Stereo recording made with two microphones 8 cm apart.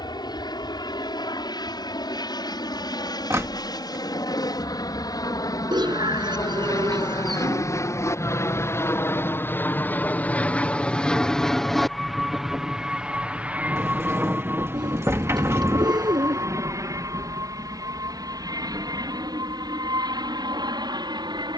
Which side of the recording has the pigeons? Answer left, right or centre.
right.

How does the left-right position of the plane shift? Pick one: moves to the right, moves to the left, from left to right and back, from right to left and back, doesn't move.
moves to the right.